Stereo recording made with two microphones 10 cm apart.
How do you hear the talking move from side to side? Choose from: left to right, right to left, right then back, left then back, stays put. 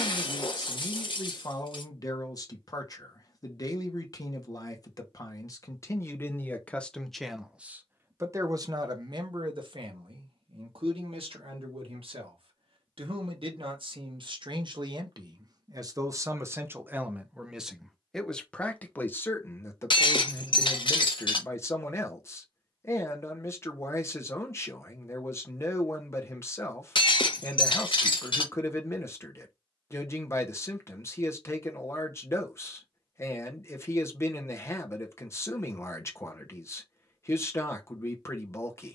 right then back.